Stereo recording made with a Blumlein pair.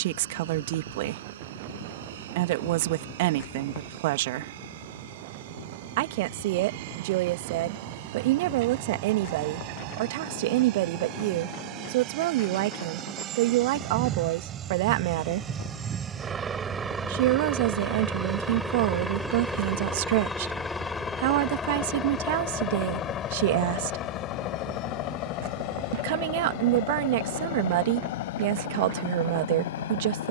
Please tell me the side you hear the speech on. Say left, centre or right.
right.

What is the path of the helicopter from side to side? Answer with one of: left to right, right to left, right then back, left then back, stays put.
right to left.